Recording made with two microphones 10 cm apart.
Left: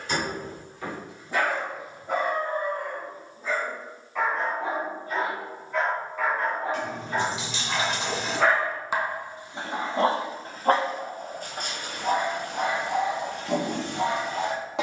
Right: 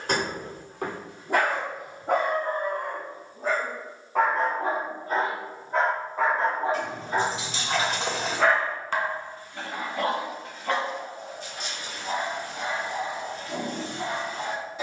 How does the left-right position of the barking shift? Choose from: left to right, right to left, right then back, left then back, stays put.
right to left.